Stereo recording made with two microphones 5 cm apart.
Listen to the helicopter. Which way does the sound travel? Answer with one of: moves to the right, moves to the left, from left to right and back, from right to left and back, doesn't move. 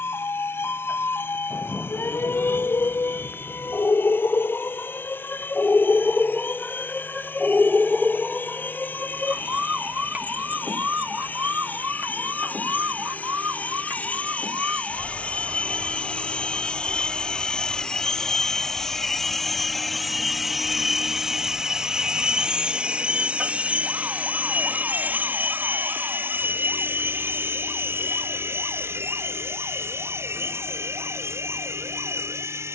moves to the right.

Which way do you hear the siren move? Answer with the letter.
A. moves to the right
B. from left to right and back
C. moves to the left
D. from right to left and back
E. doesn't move
A.